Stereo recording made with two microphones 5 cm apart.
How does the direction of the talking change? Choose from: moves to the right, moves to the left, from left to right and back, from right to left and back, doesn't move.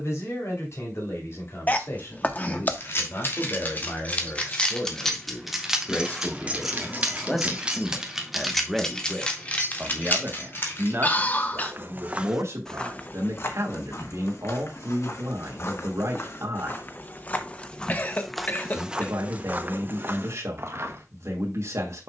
moves to the right.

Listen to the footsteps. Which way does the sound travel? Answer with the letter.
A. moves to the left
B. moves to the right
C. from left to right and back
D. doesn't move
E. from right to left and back
E.